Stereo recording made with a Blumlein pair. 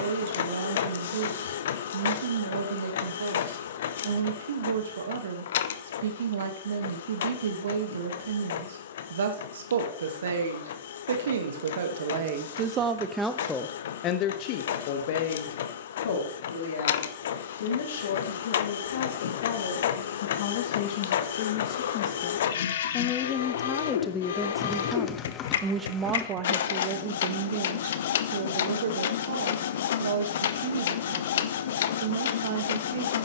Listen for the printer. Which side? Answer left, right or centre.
left.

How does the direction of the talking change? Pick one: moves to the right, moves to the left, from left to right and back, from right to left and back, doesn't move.
from right to left and back.